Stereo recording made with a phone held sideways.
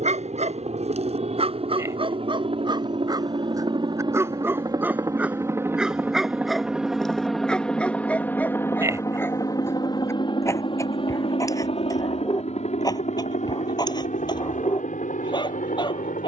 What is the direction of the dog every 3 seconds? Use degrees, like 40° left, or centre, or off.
40° right, 20° right, 10° left, 20° left, 30° left, 30° left.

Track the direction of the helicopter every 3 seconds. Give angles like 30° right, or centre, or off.
50° right, 30° right, centre, 30° left, 50° left, 60° left.